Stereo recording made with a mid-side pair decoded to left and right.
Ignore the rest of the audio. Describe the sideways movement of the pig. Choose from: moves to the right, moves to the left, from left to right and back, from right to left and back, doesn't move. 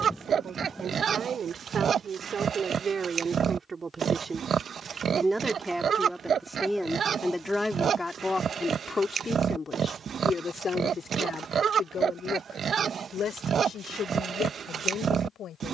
doesn't move.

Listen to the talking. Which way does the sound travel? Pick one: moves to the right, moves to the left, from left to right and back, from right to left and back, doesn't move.
moves to the left.